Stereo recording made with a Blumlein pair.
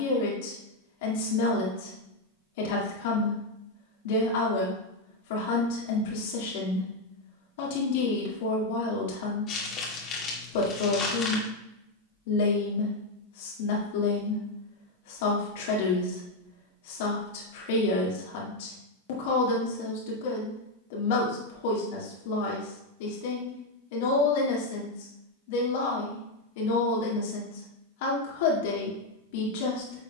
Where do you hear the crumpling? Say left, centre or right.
left.